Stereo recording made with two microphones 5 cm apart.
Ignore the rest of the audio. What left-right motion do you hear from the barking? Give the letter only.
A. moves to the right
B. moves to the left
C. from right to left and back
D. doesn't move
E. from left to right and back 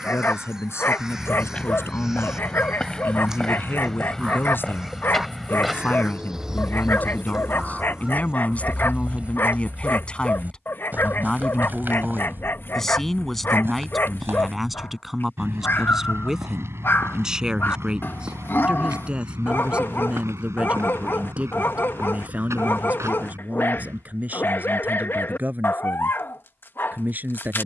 D.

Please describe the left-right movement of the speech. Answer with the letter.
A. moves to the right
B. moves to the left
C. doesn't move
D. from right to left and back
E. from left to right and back
A.